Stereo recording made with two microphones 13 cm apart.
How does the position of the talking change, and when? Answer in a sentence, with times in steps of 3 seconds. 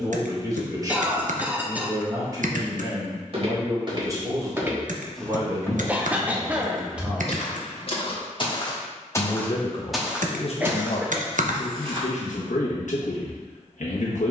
In this clip you hear the talking on the right from 0 s, in the centre from 6 s and on the left from 9 s.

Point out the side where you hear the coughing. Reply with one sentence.
You can hear the coughing in the centre.